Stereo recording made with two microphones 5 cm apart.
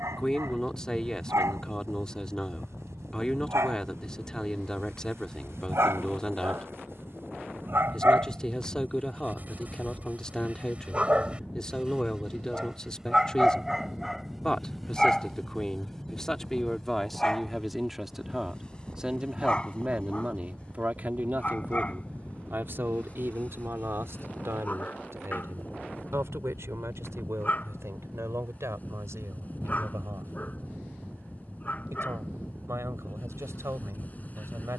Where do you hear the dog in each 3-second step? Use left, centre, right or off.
right, right, right, right, centre, centre, left, left, left, left, left, left.